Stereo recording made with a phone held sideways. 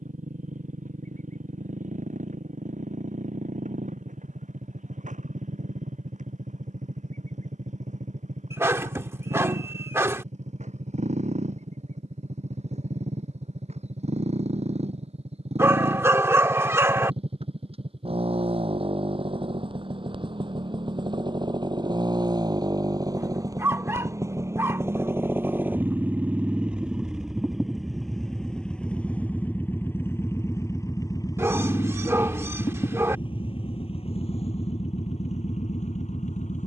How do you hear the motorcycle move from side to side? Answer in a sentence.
You can hear the motorcycle travel towards the left.